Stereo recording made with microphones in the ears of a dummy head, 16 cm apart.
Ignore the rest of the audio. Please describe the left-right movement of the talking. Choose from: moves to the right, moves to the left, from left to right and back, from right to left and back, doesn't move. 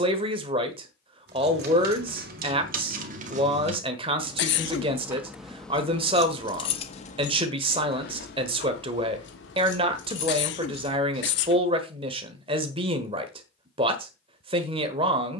doesn't move.